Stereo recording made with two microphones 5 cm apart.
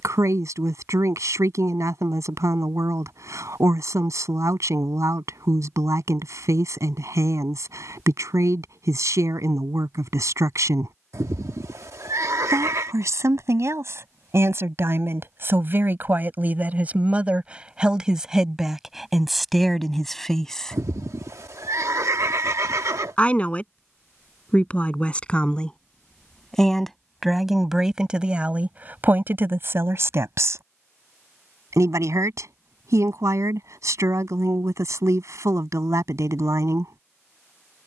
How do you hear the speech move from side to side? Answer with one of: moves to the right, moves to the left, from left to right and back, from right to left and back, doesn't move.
from right to left and back.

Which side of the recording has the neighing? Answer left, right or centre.
right.